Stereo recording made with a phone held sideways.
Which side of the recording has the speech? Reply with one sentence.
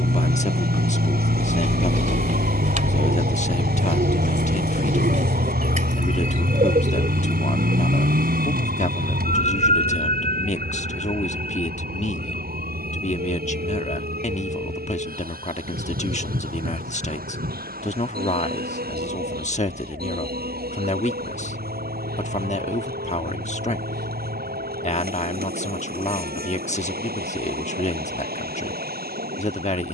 In this clip you hear the speech on the left.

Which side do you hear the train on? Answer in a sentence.
In this clip you hear the train on the right.